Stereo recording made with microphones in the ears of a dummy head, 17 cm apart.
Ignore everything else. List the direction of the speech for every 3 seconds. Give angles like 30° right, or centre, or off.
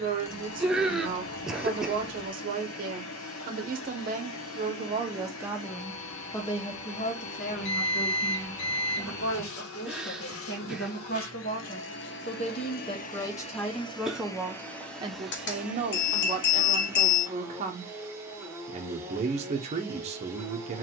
40° right, 30° right, 40° left, 50° left, 20° left, 30° right, 30° right.